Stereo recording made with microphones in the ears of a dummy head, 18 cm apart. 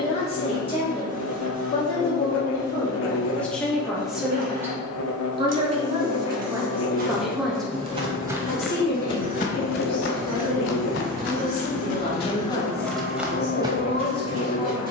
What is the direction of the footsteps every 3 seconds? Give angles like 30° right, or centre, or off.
off, off, 20° right, 50° left, 10° right.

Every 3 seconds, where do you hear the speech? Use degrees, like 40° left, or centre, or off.
20° left, 10° right, centre, 30° left, 30° left.